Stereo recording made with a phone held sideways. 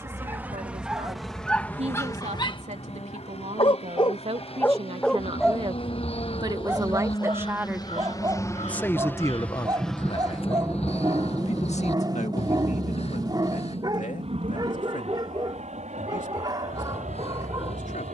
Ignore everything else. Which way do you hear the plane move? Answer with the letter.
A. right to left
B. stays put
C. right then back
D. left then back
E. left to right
E.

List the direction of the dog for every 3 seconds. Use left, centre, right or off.
centre, left, right, right, right, right.